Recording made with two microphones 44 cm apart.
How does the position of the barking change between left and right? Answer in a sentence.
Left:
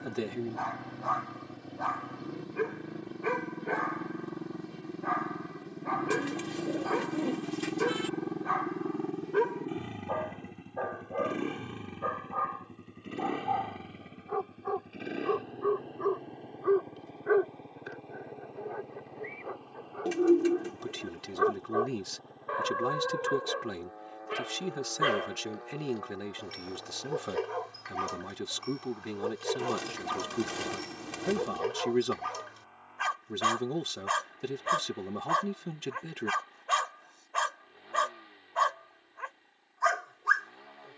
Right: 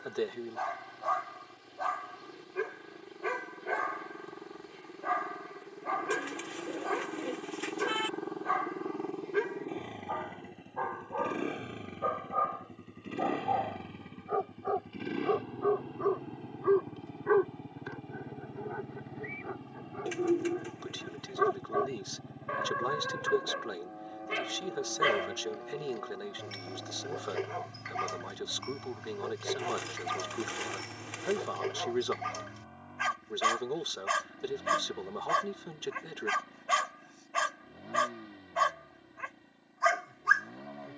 You can hear the barking go left and come back.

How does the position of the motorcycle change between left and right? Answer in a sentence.
In this clip you hear the motorcycle move from left to right.